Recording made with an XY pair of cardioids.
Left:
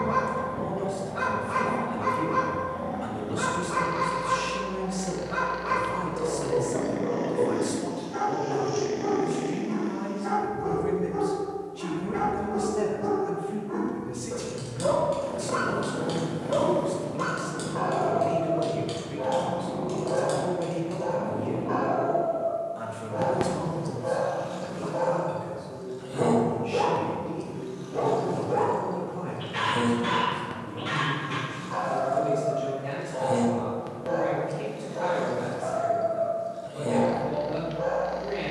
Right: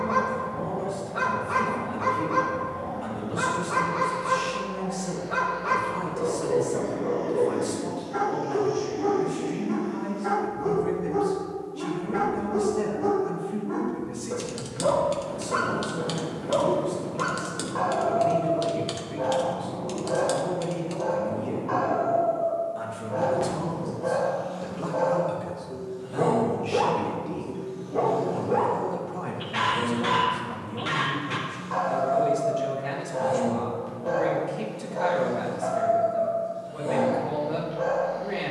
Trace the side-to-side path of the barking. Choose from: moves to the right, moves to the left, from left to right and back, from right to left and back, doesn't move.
doesn't move.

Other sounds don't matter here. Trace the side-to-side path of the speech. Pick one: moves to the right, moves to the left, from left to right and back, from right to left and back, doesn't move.
moves to the right.